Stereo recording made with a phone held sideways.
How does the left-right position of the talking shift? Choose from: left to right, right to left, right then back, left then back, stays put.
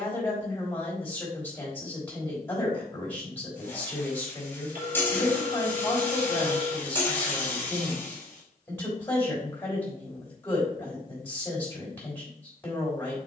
stays put.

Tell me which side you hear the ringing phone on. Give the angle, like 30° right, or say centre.
60° right.